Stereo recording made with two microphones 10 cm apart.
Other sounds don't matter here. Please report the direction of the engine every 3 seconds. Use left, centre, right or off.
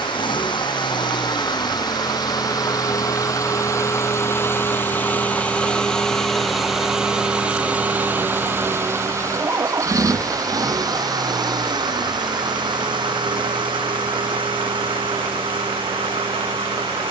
left, left, centre, right, right, right.